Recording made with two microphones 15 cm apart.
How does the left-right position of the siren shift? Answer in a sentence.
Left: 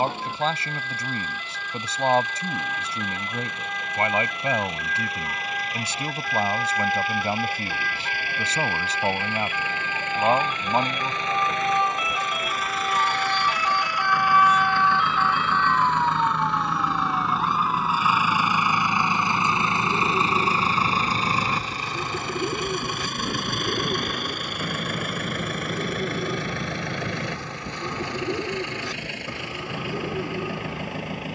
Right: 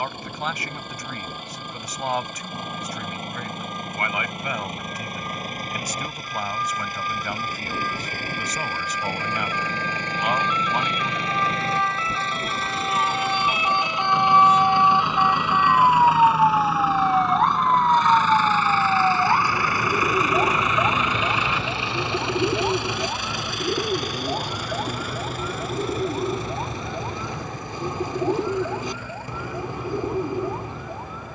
You can hear the siren move from left to right.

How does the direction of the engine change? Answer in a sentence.
In this clip you hear the engine travel towards the left.